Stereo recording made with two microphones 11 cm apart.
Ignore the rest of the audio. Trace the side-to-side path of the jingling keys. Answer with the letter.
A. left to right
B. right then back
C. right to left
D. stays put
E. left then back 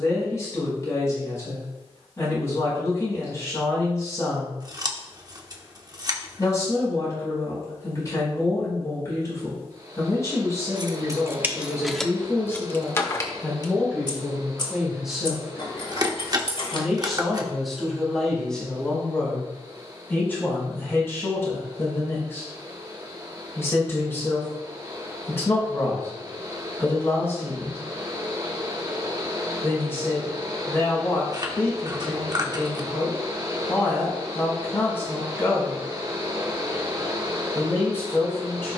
C.